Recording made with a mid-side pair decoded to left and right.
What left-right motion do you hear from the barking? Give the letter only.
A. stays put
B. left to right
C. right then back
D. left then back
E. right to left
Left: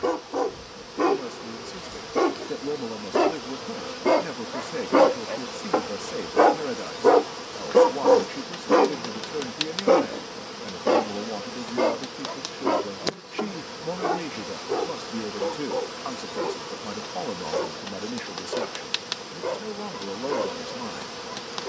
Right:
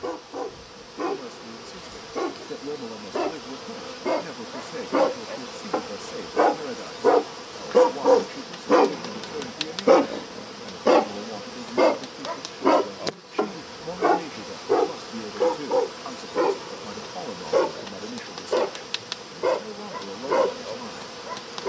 B.